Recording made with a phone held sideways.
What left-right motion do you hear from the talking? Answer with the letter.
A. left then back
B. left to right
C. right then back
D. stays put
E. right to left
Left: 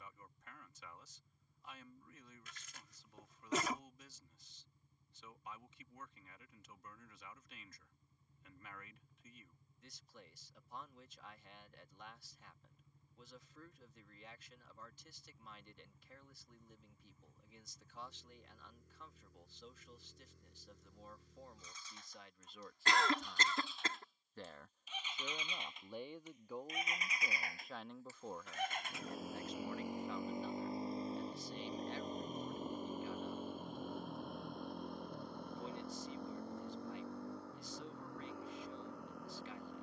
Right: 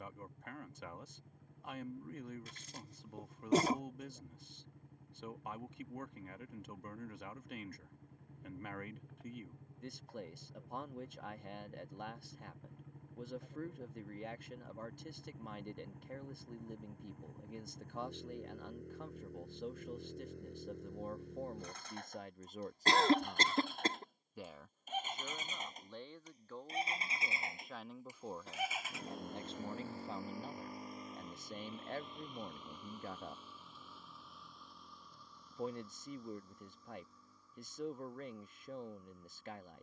A.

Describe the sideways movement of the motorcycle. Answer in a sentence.
You can hear the motorcycle move to the left.